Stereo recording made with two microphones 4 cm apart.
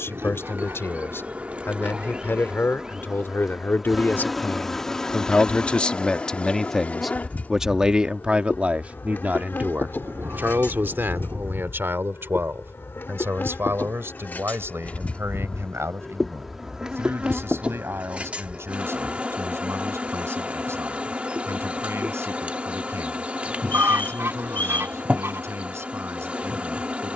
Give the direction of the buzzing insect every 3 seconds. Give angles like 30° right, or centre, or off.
30° right, 10° left, 40° left, 60° left, 50° left, centre, 30° right, 30° right, 30° right.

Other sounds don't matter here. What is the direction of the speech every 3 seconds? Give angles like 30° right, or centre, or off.
70° left, 40° left, 10° right, 50° right, 60° right, 70° right, 80° right, 80° right, 80° right.